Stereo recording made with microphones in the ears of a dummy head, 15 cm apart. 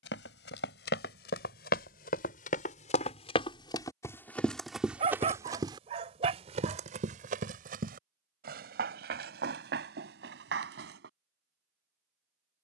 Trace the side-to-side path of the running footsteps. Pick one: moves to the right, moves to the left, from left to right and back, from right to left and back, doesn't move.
moves to the right.